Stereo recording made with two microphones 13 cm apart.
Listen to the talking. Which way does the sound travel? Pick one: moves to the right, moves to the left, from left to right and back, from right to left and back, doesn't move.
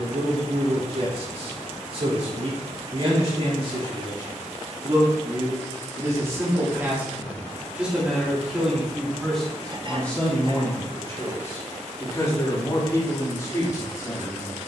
moves to the left.